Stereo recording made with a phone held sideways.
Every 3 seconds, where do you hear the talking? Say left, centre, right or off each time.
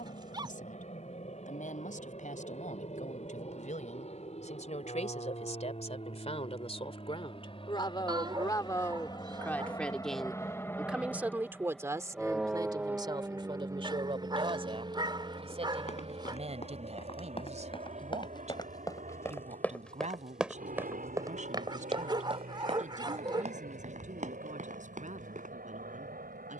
left, left, left, centre, right, right, right, right, right.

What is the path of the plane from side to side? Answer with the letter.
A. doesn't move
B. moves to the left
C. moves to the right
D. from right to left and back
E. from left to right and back
C.